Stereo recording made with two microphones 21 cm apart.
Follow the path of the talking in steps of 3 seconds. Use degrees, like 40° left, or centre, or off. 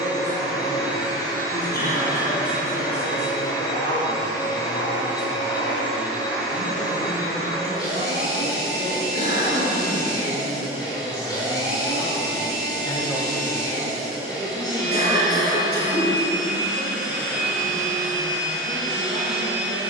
50° left, 50° left, 50° left, 40° left, centre, 50° right, 70° right.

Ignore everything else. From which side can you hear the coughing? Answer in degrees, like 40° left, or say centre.
50° left.